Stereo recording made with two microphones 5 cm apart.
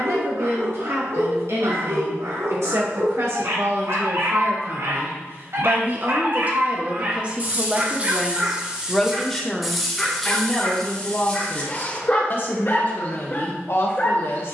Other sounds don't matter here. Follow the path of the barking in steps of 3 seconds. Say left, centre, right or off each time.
right, right, right, centre, left.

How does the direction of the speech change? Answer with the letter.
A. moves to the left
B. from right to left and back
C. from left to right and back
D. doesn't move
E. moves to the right
A.